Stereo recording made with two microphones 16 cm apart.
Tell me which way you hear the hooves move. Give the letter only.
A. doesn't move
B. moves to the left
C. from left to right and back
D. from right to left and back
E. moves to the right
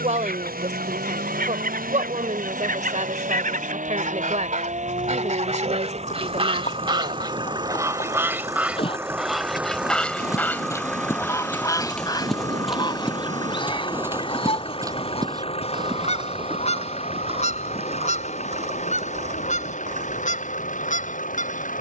E.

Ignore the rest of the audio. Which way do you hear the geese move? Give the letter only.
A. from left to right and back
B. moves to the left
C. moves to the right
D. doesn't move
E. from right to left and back
B.